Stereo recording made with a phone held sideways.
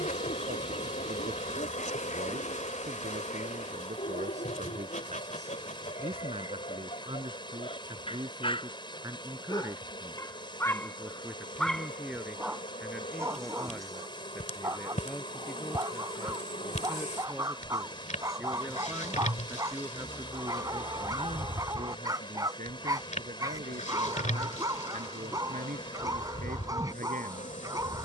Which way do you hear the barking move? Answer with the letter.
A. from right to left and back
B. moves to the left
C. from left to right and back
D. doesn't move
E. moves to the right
E.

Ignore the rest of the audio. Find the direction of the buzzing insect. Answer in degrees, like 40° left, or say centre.
60° left.